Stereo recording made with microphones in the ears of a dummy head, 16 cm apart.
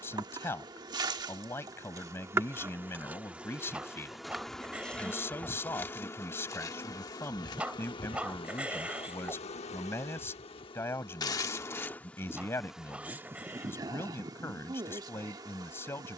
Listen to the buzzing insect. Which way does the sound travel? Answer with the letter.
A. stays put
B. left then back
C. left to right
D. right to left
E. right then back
B.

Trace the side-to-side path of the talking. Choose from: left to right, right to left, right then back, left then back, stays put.
stays put.